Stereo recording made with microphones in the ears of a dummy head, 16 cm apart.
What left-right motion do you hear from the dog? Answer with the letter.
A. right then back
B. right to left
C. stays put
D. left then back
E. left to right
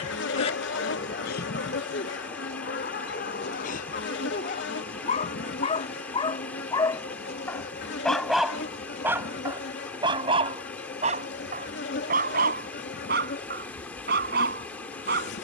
E.